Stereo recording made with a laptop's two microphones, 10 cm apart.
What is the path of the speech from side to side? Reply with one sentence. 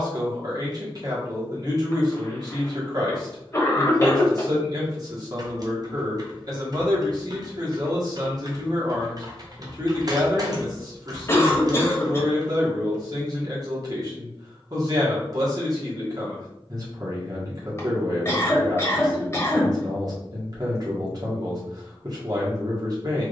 You can hear the speech stay in one place.